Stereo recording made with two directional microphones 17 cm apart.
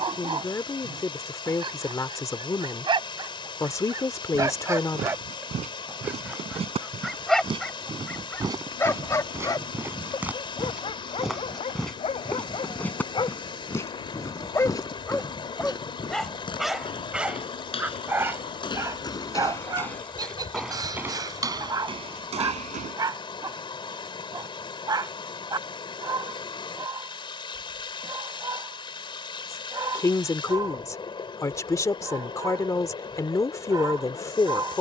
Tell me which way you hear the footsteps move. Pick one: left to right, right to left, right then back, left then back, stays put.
left then back.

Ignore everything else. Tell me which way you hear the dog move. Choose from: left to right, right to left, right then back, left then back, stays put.
left then back.